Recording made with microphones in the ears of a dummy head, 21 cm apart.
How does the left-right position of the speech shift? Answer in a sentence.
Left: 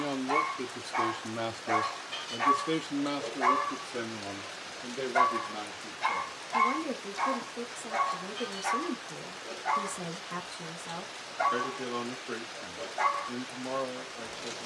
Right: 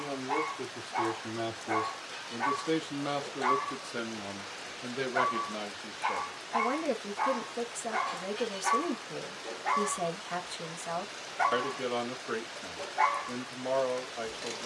You can hear the speech move from left to right.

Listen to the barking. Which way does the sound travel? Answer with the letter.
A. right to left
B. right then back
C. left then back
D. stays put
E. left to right
E.